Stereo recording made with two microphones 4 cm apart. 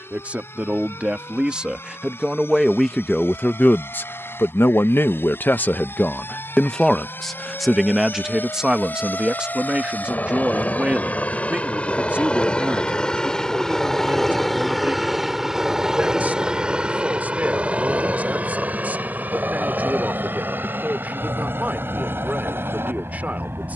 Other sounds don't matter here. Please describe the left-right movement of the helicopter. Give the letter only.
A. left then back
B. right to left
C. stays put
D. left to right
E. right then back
D.